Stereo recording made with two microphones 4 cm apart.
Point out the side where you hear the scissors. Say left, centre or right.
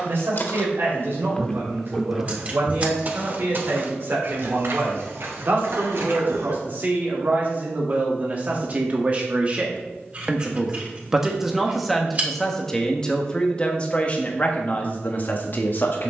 right.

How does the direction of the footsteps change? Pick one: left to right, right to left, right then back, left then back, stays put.
left to right.